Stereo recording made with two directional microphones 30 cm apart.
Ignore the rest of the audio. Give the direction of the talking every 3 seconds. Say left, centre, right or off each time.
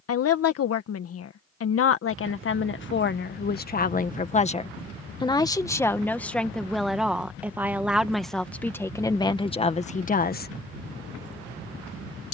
left, left, centre, left.